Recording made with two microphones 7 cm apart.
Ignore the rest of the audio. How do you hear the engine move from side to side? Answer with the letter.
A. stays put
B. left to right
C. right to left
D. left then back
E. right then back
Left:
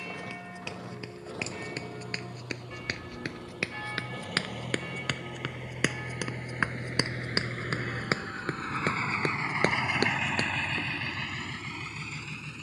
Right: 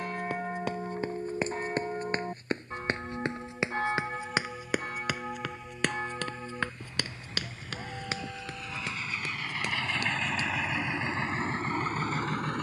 B.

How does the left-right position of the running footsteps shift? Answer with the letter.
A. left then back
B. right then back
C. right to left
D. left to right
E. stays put
C.